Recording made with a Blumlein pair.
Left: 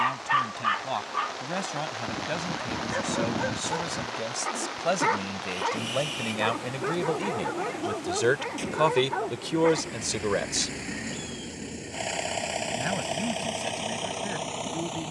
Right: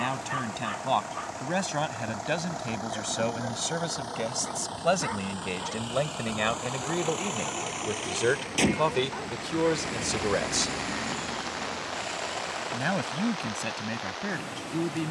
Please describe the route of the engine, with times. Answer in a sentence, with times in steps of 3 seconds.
In this clip you hear the engine on the right from 0 s, in the centre from 9 s and on the left from 12 s.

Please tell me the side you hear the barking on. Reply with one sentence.
In this clip you hear the barking on the left.